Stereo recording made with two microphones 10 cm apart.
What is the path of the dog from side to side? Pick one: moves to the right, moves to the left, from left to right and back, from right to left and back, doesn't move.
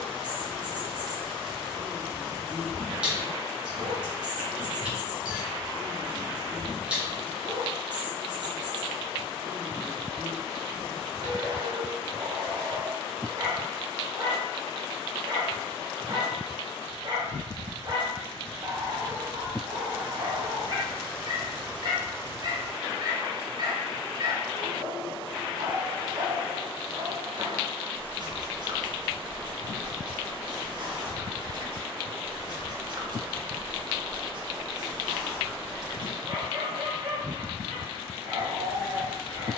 doesn't move.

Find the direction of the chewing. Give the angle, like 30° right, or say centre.
10° right.